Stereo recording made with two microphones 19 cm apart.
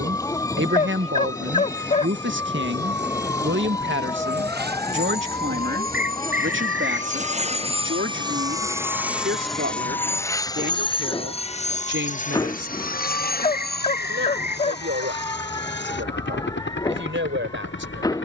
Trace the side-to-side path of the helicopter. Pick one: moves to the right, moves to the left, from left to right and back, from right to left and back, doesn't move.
moves to the left.